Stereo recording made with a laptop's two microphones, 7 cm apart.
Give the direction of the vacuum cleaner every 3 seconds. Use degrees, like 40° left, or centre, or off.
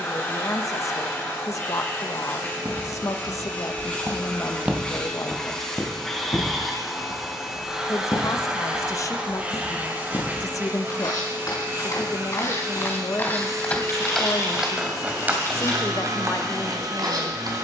30° left, 20° left, 10° right, 30° right, 50° right, 60° right.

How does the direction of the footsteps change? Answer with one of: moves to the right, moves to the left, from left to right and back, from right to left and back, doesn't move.
from right to left and back.